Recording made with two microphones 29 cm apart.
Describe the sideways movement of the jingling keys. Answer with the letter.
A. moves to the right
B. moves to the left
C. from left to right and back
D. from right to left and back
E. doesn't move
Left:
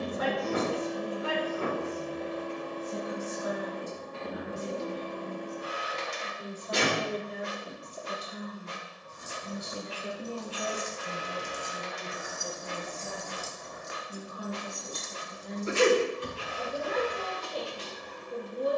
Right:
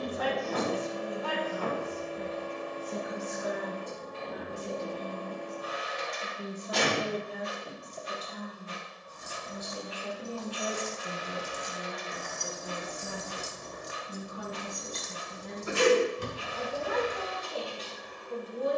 A.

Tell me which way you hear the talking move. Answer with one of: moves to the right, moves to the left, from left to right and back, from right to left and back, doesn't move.
from right to left and back.